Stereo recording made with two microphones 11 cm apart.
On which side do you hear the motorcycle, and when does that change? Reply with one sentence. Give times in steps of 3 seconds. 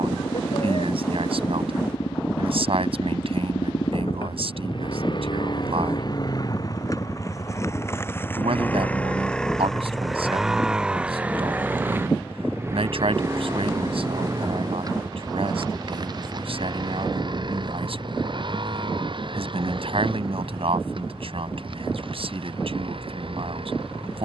In this clip you hear the motorcycle on the left from 0 s, in the centre from 9 s and on the right from 12 s.